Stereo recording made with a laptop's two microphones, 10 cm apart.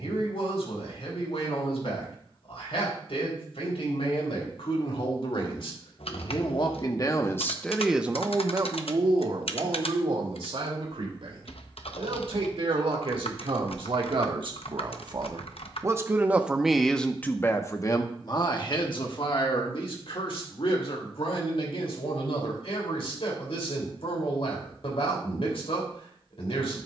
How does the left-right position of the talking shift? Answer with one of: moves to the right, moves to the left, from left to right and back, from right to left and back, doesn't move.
from left to right and back.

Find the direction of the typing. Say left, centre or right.
left.